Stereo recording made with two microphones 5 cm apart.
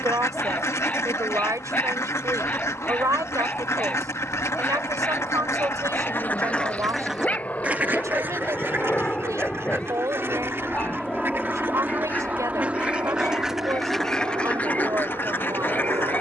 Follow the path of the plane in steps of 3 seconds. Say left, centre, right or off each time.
left, left, left, centre, right, right.